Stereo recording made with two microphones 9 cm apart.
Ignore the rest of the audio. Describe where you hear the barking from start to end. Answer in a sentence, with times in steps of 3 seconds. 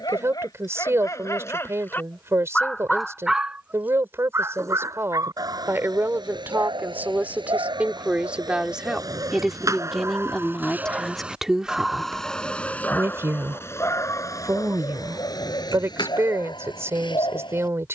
In this clip you hear the barking on the left from 0 s, on the right from 3 s and on the left from 12 s.